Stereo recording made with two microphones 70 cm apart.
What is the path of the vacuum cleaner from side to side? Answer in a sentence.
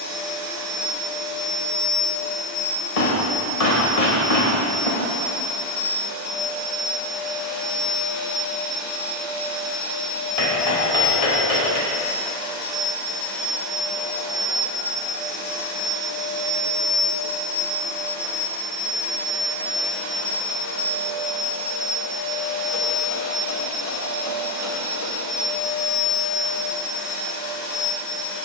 In this clip you hear the vacuum cleaner move to the right.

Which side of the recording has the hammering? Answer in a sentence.
In this clip you hear the hammering on the left.